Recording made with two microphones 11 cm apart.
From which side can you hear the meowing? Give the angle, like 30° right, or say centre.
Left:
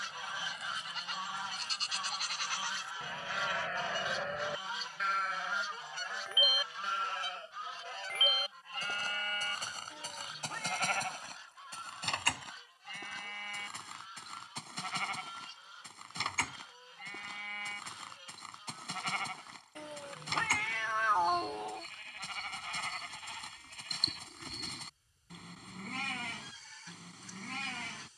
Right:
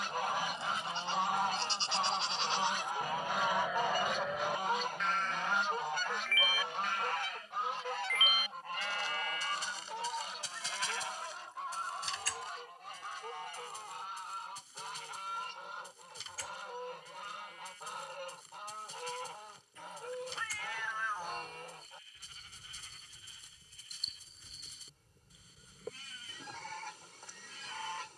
60° left.